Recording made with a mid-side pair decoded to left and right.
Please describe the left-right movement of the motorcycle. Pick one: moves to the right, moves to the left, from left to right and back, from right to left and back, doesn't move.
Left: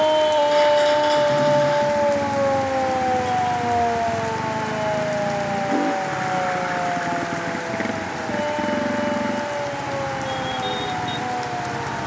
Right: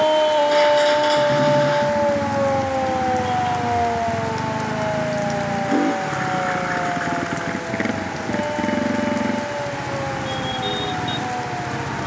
doesn't move.